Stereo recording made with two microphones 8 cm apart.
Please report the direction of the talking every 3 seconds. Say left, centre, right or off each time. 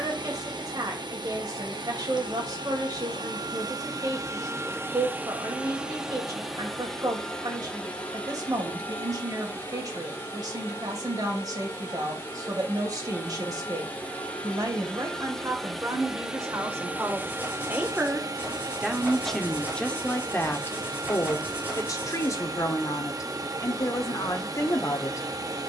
right, right, right, right, right, right, centre, left, left.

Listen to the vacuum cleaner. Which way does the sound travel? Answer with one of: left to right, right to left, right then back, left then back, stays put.
left then back.